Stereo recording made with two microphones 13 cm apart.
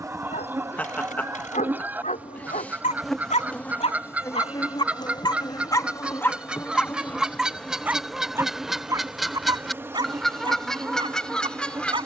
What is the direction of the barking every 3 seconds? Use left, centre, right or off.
left, left, centre, right.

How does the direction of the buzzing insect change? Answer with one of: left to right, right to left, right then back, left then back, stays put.
left then back.